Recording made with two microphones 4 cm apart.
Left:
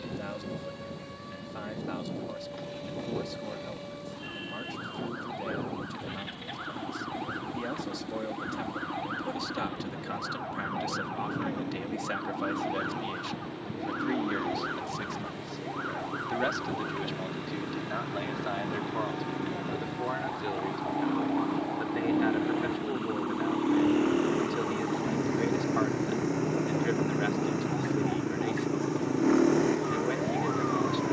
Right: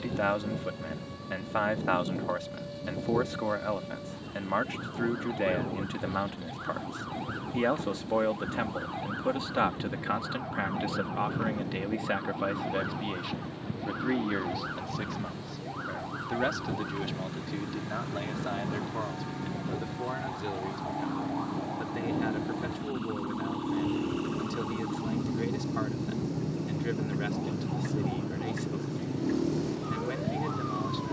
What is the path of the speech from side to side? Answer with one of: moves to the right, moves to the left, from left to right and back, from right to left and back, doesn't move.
moves to the left.